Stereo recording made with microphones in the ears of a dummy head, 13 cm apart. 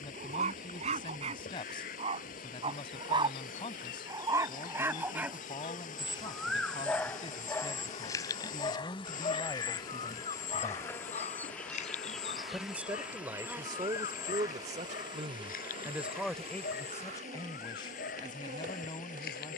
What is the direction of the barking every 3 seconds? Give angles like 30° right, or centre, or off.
50° right, 20° right, 20° left, 40° left, 60° left, 70° left, 70° left.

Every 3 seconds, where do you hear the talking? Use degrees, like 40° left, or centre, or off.
30° left, 30° left, 30° left, 20° left, 30° right, centre, 30° left.